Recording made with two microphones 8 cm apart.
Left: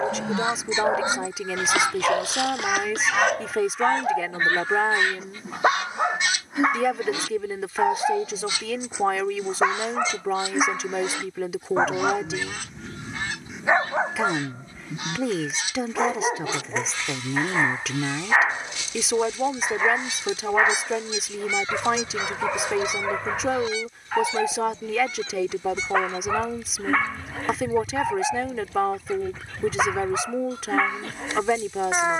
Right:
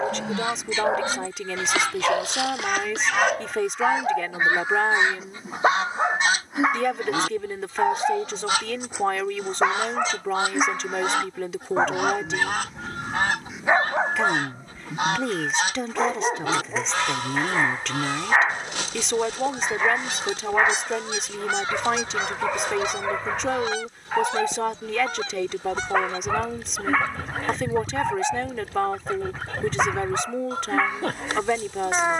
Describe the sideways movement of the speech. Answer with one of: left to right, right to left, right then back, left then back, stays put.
stays put.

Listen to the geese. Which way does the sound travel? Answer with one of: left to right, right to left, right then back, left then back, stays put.
left to right.